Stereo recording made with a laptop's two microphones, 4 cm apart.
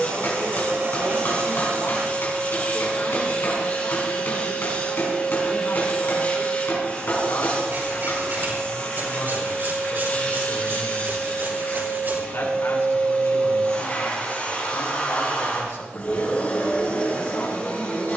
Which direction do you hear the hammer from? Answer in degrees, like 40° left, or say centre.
60° left.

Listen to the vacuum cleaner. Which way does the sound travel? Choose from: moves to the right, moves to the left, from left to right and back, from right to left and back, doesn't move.
doesn't move.